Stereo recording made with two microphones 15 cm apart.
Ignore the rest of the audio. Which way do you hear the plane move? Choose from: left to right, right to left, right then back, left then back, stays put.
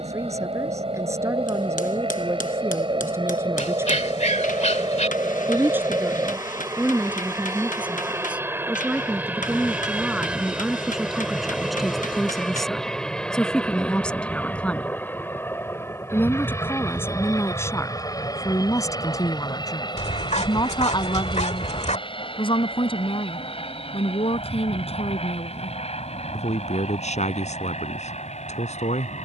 right to left.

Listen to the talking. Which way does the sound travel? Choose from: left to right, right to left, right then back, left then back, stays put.
right to left.